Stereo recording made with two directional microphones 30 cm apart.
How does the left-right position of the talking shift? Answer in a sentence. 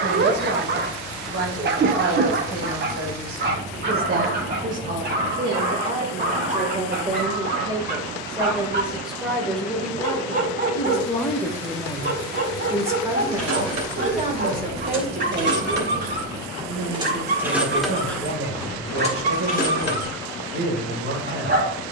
In this clip you hear the talking move from right to left and back again.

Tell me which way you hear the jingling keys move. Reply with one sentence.
You can hear the jingling keys move to the left.